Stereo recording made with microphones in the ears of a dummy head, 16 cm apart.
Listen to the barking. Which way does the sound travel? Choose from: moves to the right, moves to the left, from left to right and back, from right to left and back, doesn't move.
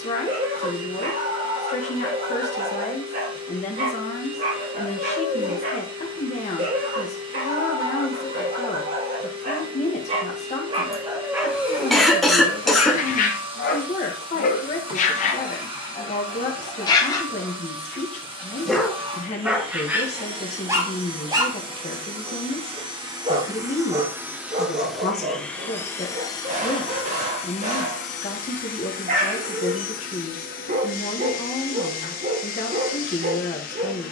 from right to left and back.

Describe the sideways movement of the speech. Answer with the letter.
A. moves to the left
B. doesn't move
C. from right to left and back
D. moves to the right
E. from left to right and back
B.